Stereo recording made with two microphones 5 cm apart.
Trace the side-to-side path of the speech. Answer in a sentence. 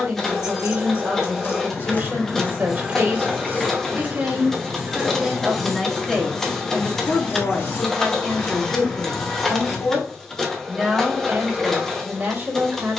In this clip you hear the speech move from right to left and back again.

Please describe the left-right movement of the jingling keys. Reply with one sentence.
In this clip you hear the jingling keys move from left to right and back again.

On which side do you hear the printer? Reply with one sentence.
You can hear the printer in the centre.